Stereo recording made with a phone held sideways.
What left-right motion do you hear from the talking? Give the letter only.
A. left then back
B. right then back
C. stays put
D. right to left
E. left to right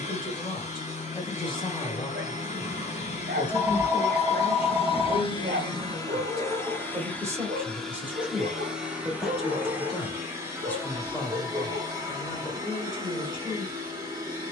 B.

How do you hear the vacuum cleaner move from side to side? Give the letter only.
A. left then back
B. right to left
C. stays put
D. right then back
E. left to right
E.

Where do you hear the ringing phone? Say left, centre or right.
centre.